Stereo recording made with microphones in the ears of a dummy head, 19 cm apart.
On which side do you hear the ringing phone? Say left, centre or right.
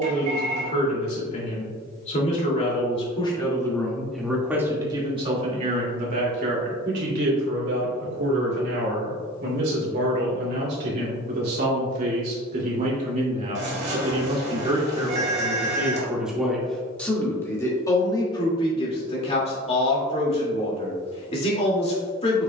right.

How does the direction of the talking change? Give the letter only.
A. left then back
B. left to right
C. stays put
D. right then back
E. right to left
D.